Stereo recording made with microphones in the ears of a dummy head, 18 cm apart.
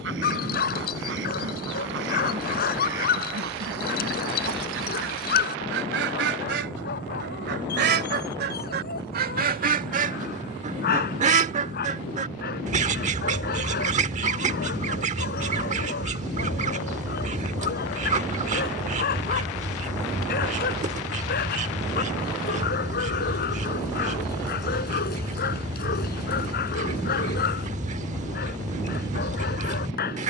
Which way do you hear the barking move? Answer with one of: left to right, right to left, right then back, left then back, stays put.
stays put.